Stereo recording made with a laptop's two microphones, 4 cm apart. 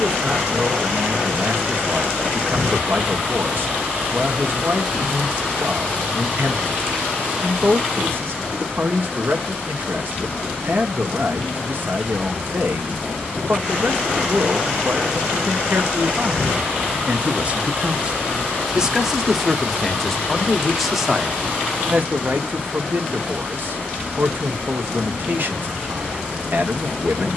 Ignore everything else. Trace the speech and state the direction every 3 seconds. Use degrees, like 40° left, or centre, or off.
50° right, 50° right, 50° right, 50° right, 50° right, 40° right, centre, 40° right, 50° right.